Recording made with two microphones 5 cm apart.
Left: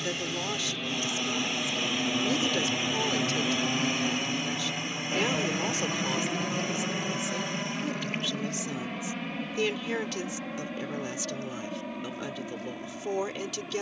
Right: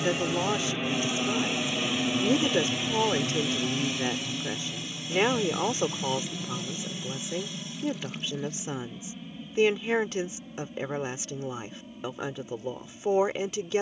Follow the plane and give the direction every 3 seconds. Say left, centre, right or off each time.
centre, left, left, left, left.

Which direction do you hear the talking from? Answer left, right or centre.
right.